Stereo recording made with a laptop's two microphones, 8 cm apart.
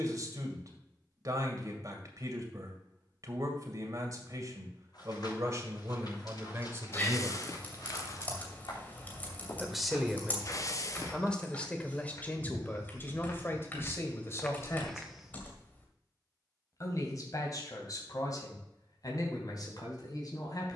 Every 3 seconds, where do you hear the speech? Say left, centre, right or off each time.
right, right, right, centre, left, left, left.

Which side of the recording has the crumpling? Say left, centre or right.
left.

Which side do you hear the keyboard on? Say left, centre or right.
left.